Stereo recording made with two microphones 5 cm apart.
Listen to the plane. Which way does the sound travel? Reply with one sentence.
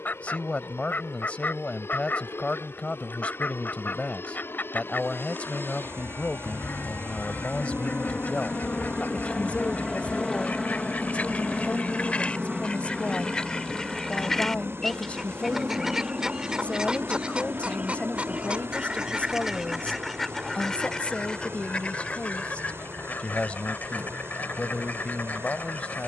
In this clip you hear the plane go from the left side to the right.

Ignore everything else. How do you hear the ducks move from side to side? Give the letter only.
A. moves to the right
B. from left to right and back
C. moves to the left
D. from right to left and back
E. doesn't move
B.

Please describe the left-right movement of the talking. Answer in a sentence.
In this clip you hear the talking stay put.